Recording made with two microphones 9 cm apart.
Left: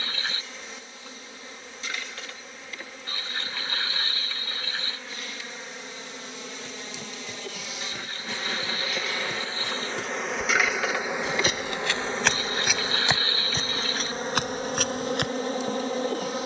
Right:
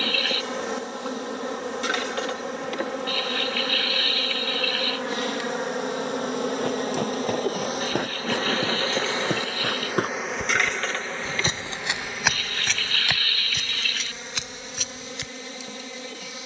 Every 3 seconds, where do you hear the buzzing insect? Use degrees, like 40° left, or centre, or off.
80° right, 70° right, 50° right, centre, 40° left, 50° left.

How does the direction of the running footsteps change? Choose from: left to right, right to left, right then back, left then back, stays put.
right to left.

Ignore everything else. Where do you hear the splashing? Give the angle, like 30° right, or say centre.
30° left.